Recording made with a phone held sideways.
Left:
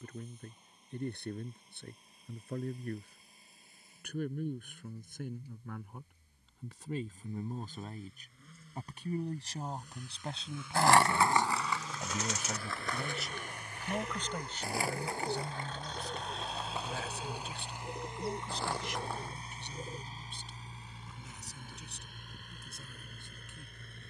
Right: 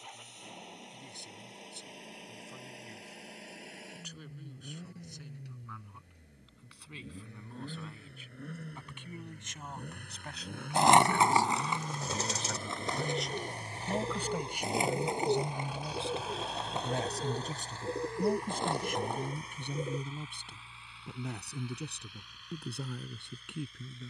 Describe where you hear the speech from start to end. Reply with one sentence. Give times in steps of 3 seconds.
In this clip you hear the speech on the left from 0 s, in the centre from 12 s and on the right from 15 s.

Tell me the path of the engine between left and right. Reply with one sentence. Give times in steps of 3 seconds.
You can hear the engine on the right from 0 s, in the centre from 15 s and on the left from 18 s.